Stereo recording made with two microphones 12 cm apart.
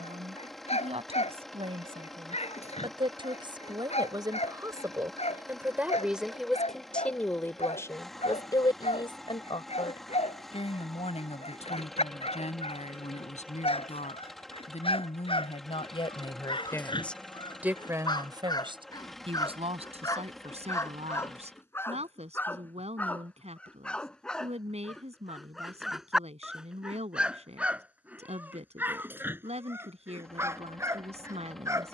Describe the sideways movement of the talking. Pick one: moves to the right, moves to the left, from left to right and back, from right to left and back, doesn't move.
from right to left and back.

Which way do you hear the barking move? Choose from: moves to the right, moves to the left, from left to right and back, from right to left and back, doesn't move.
moves to the right.